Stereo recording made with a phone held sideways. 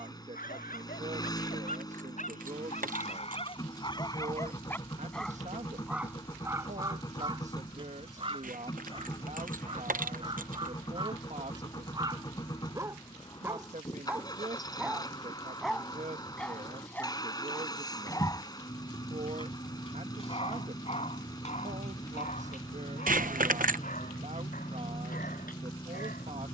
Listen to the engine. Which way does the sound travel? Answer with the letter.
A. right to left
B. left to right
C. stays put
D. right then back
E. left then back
C.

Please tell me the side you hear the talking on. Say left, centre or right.
right.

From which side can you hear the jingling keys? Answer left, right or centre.
right.